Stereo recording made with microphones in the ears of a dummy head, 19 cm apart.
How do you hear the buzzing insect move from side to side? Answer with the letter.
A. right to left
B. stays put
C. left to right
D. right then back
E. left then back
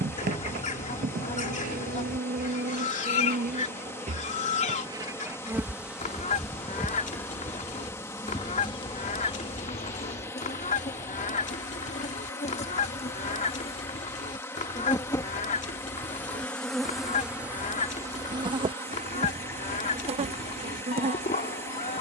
E.